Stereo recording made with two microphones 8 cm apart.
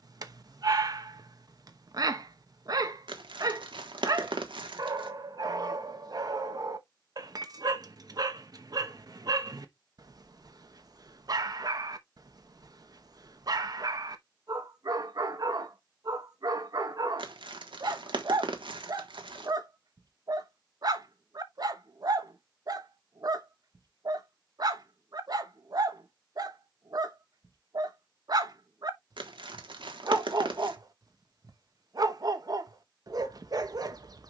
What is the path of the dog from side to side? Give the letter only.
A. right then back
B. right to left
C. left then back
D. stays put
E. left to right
D.